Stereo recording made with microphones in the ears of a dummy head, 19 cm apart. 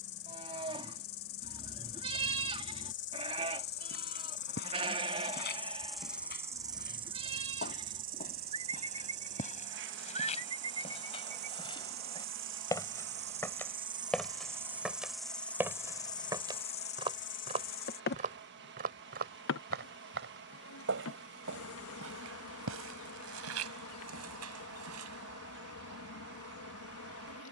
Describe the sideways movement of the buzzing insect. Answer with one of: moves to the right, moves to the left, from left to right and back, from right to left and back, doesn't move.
from left to right and back.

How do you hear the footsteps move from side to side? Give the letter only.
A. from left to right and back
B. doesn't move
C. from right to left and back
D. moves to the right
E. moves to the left
D.